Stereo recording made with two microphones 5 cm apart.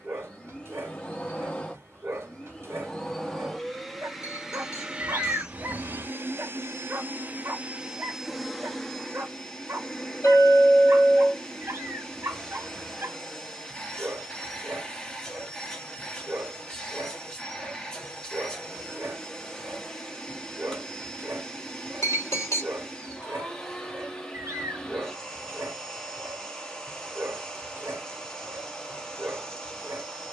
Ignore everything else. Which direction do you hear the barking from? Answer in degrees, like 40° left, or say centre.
50° right.